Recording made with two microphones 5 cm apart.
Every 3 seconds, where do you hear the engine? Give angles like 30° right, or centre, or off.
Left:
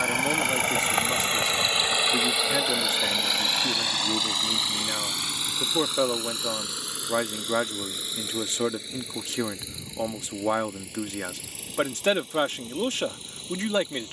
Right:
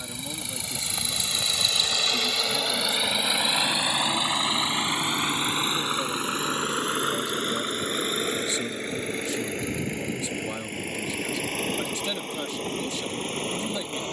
30° left, 20° right, 40° right, 50° right, 50° right.